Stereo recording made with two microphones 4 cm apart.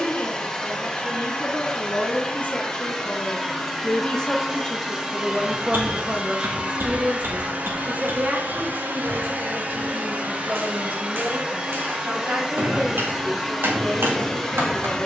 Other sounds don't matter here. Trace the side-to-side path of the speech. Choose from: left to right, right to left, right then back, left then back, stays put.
left to right.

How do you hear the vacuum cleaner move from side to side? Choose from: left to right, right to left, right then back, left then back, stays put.
right then back.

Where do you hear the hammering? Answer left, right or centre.
right.